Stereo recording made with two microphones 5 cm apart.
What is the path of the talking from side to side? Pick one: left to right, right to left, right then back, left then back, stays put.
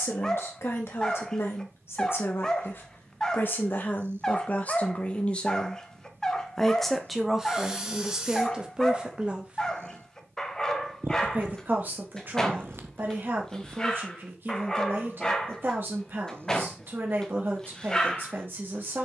left to right.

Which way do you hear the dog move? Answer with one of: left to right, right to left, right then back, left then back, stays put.
stays put.